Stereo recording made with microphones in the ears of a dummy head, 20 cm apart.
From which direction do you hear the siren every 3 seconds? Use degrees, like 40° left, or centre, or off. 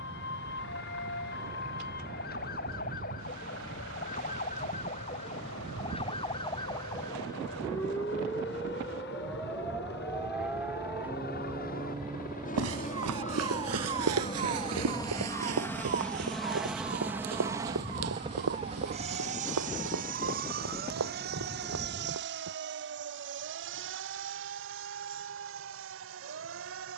50° left, 40° left, 20° left, 10° right, 20° right, 40° right, 40° right, 50° right, 50° right.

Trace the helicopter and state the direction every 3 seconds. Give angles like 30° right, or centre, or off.
70° left, 70° left, 60° left, 50° left, 30° left, centre, 40° right, 60° right, 70° right.